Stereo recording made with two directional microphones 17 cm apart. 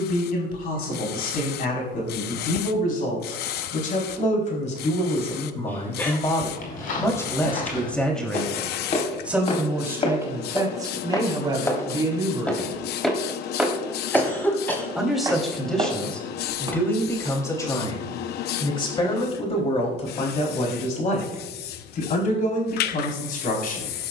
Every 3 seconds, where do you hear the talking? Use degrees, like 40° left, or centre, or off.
60° left, 40° left, 10° left, 20° right, 20° right, 10° left, 40° left, 50° left.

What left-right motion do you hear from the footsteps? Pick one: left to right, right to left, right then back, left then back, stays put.
left to right.